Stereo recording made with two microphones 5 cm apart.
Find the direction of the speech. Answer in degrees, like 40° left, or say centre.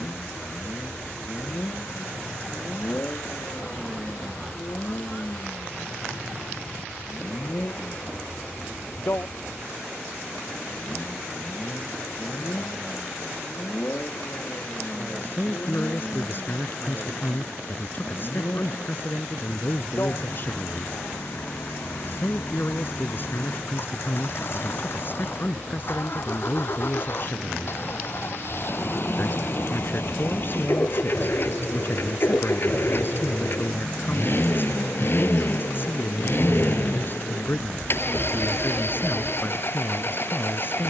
40° left.